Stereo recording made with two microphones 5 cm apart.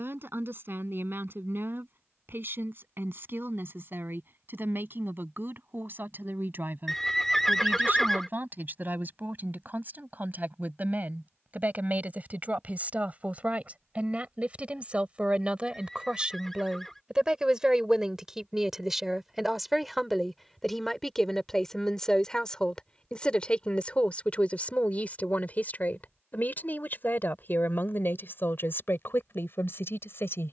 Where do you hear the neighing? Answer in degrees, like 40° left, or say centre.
10° left.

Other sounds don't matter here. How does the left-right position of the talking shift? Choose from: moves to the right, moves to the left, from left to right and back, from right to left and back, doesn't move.
moves to the left.